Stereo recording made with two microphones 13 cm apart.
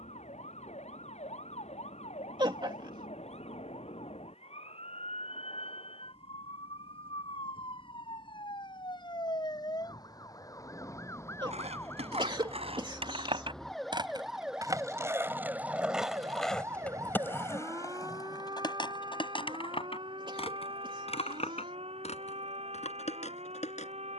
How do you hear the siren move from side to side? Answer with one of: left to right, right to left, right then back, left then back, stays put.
left to right.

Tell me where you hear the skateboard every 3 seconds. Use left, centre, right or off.
off, off, off, right, right, centre, left, left.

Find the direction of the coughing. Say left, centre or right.
right.